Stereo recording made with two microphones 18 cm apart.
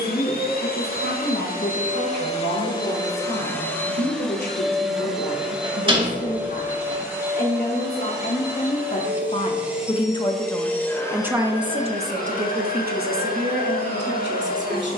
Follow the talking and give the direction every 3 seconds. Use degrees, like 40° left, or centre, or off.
70° left, 70° left, 60° left, 10° left, 60° right.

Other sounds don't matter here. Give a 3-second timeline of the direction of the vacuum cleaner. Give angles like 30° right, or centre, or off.
40° left, centre, 10° right, 10° left, 50° left.